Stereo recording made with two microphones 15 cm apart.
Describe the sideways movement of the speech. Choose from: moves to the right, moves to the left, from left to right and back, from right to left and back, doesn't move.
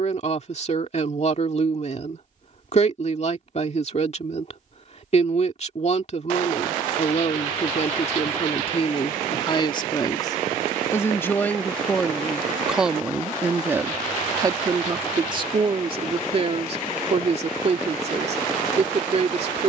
moves to the right.